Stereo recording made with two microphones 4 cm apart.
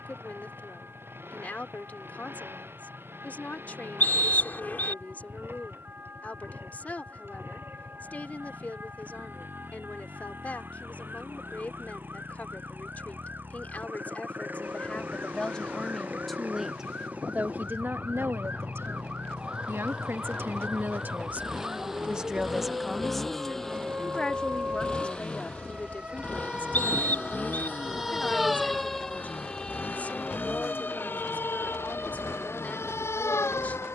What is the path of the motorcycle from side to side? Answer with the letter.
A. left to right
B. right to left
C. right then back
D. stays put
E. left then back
B.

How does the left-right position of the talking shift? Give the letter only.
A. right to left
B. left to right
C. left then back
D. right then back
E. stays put
D.